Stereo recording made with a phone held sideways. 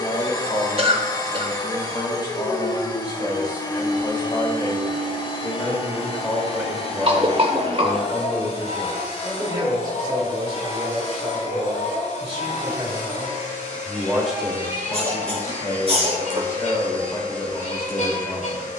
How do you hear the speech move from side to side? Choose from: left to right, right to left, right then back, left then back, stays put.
right then back.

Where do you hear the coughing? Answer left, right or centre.
right.